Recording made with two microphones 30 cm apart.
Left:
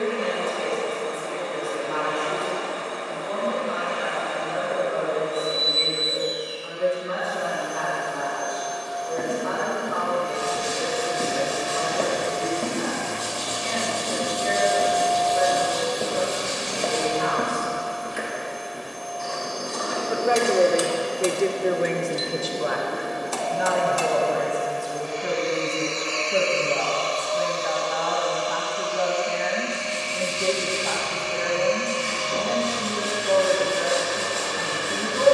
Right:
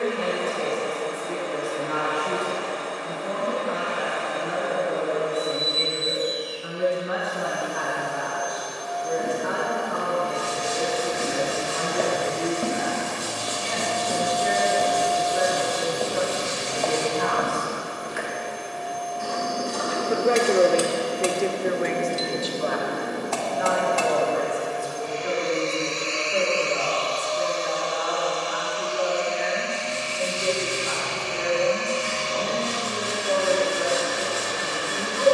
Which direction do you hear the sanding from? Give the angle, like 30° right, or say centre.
50° left.